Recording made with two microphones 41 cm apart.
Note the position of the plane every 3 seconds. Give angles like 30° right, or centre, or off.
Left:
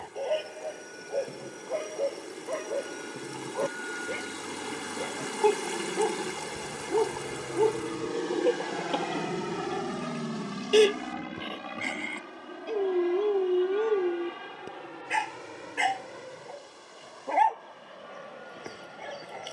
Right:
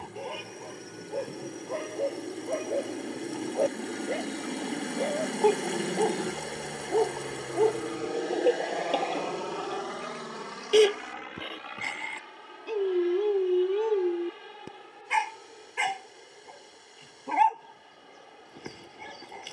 70° right, 50° right, centre, 50° left, 70° left, 70° left, 80° left.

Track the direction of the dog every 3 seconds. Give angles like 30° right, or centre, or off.
10° right, 20° left, 20° left, centre, 10° right, 20° right, 20° right.